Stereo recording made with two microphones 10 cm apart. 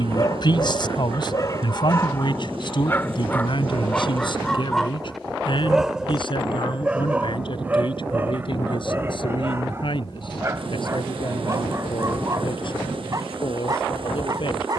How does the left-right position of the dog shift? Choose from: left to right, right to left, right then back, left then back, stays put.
left to right.